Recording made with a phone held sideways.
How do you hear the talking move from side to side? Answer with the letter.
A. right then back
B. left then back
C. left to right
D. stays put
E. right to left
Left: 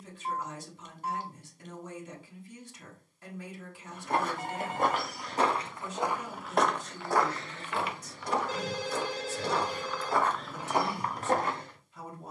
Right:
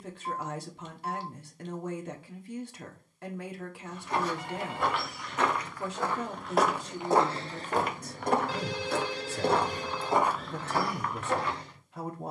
D.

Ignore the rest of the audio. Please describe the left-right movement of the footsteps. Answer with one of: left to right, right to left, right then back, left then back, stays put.
right then back.